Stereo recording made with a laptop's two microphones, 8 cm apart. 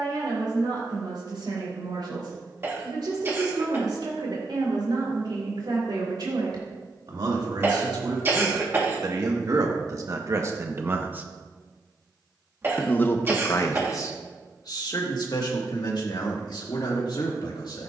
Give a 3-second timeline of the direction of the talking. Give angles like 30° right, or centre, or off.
80° right, 70° right, 60° right, 40° right, 40° left, 70° left.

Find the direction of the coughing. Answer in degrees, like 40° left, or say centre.
30° right.